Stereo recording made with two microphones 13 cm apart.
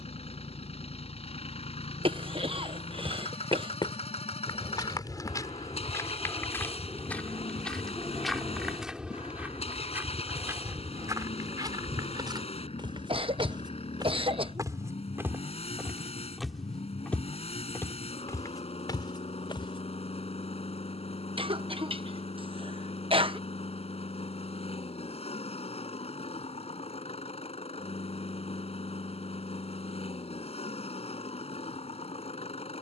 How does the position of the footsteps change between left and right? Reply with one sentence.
You can hear the footsteps go right and come back.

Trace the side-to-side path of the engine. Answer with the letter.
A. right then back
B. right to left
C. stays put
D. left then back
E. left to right
C.